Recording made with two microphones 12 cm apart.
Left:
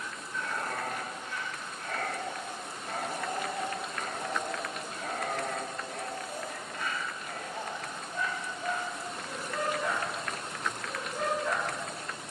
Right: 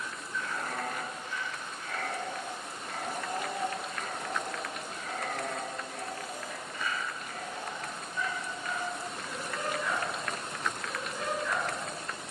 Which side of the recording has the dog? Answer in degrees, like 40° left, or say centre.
50° left.